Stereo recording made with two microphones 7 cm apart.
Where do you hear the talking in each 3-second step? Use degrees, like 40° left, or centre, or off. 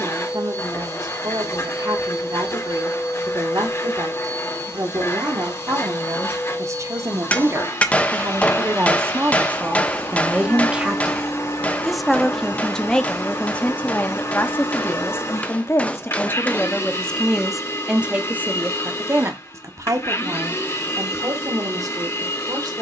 60° right, 50° right, 40° right, 20° right, 20° left, 20° left, 40° right, 60° right.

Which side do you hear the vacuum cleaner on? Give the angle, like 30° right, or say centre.
40° left.